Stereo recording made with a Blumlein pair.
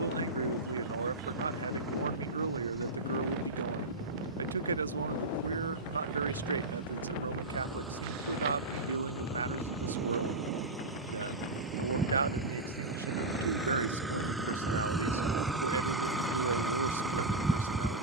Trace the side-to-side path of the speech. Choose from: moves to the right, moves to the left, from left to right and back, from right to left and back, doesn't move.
doesn't move.